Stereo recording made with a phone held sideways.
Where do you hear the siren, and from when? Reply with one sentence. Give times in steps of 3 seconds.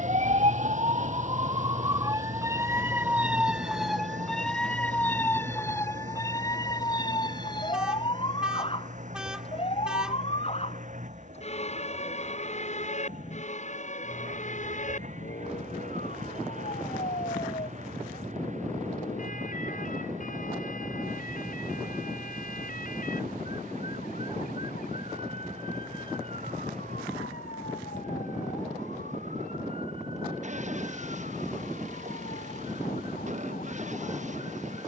In this clip you hear the siren on the right from 0 s, in the centre from 3 s and on the left from 6 s.